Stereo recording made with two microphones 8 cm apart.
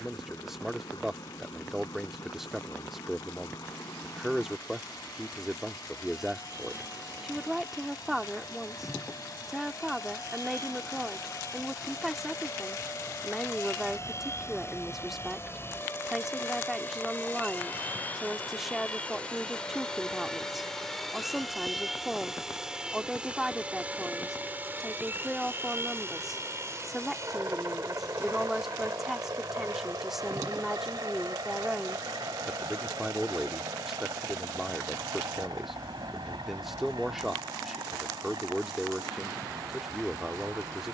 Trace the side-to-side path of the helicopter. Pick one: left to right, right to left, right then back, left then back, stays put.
left to right.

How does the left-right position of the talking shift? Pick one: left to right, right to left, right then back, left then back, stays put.
stays put.